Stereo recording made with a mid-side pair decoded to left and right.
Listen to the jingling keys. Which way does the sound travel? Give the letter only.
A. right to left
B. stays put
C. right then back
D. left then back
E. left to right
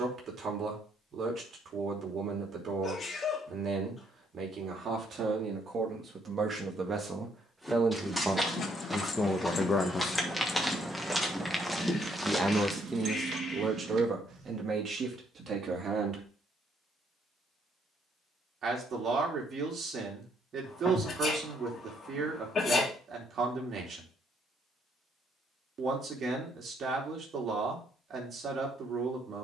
E.